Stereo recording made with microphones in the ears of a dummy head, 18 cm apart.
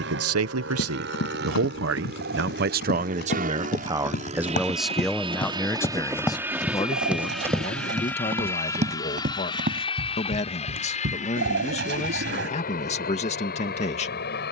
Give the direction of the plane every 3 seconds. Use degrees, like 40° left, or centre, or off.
60° right, 30° right, centre, 30° left, 40° left.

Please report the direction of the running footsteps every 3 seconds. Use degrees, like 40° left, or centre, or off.
60° left, 40° left, 10° right, 50° right, off.